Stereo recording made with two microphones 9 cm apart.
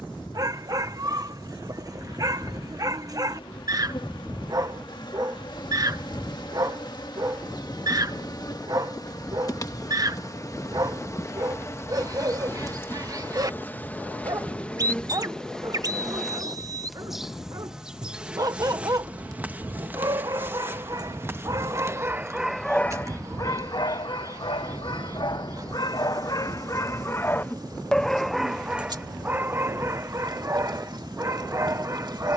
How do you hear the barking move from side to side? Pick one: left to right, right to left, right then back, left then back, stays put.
left then back.